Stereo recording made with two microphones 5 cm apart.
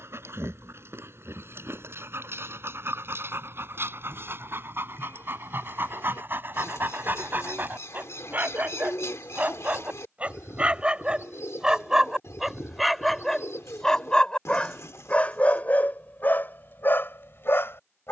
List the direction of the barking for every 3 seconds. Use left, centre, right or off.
right, right, right, right, centre, left.